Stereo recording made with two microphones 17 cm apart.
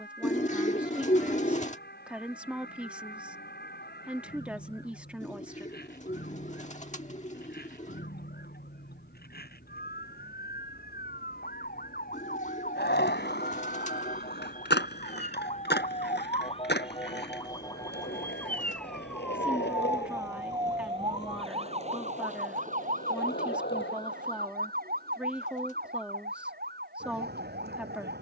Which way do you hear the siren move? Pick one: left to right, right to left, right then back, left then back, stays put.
left to right.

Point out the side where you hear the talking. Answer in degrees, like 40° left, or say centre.
10° right.